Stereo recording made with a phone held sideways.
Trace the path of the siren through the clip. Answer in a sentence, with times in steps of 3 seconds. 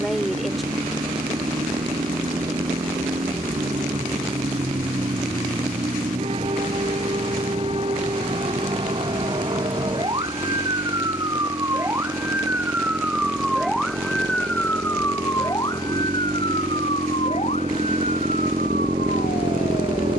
You can hear the siren on the right from 0 s, in the centre from 12 s and on the left from 15 s.